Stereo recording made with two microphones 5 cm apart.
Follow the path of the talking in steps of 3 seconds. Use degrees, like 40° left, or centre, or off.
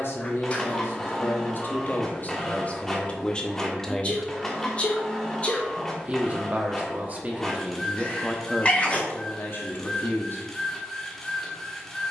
50° left, 10° left, 10° right, 50° left.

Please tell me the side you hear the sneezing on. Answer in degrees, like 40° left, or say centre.
30° left.